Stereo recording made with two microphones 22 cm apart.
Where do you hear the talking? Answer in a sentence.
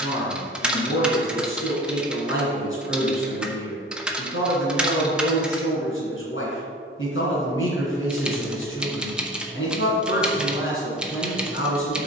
You can hear the talking on the left.